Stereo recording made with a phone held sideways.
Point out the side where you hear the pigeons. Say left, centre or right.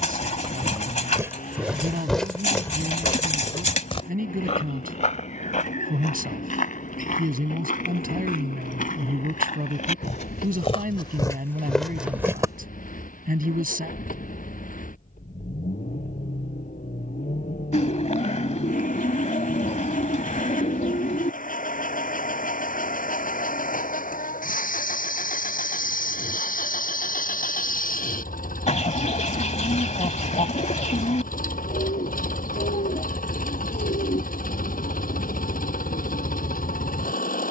left.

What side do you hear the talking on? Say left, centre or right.
right.